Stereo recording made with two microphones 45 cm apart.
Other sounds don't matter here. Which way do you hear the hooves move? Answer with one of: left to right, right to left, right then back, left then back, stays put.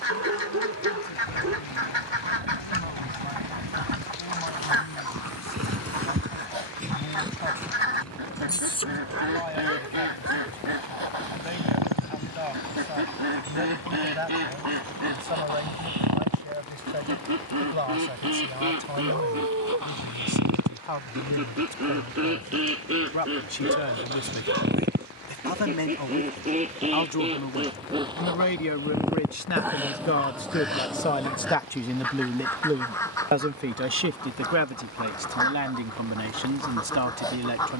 right to left.